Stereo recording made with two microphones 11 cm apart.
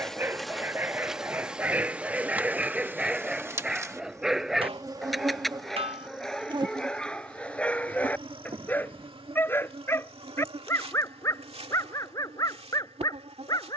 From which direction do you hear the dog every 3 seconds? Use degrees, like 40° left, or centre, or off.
10° right, centre, 10° left, 20° left, 30° left.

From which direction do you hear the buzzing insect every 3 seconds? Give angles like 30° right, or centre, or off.
10° right, 30° right, 50° right, 60° right, 60° right.